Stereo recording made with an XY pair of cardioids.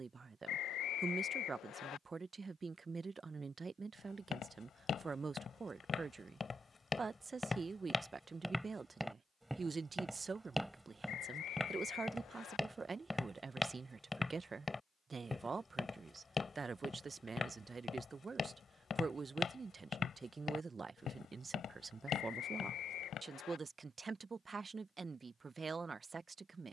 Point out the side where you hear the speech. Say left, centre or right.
right.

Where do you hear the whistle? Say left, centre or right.
left.